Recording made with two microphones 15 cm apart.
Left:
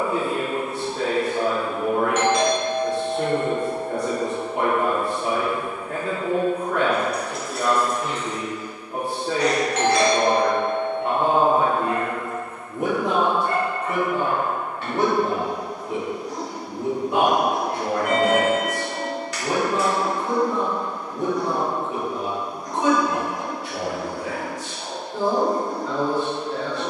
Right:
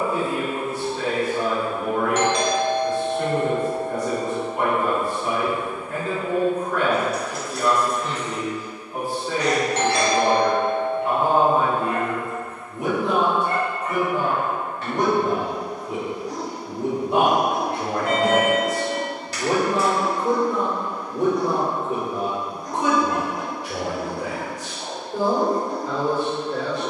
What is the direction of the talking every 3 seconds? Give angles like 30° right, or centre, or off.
60° left, 60° left, 60° left, 60° left, 30° left, 10° right, 40° right, 40° right, 40° right.